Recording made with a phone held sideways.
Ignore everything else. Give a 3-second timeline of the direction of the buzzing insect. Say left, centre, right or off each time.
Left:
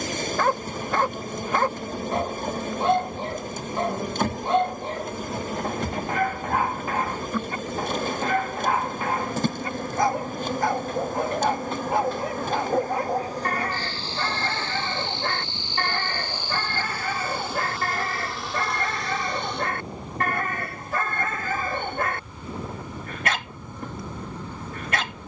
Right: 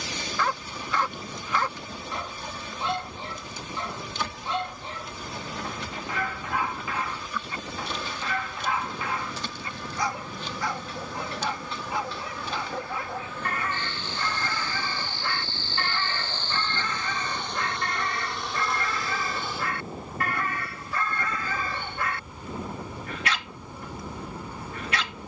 left, left, left, left, left, centre, centre, centre, centre.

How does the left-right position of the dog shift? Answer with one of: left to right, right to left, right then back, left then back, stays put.
stays put.